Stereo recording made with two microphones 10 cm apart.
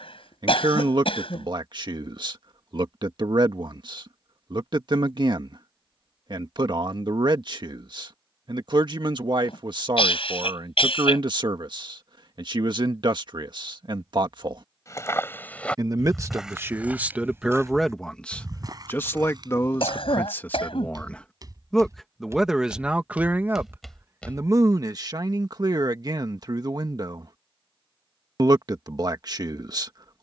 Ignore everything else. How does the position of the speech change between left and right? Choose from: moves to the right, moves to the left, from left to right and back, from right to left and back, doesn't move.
from right to left and back.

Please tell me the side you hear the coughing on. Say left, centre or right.
left.